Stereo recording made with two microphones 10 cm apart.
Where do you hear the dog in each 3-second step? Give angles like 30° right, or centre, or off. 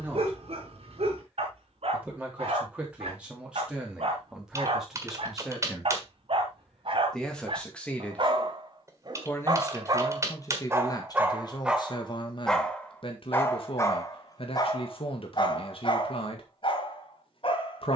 70° right, 70° right, 60° right, 30° right, 20° left, 50° left.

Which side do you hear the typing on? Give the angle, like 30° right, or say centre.
30° right.